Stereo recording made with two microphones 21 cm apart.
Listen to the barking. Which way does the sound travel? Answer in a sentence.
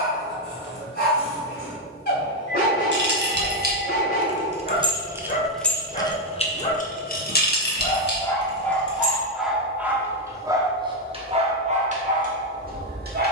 You can hear the barking move to the right.